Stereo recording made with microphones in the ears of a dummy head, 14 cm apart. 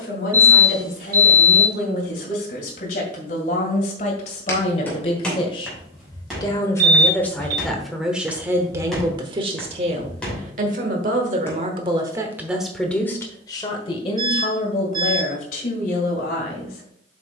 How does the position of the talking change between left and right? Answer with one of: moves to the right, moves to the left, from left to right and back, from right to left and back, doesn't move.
from left to right and back.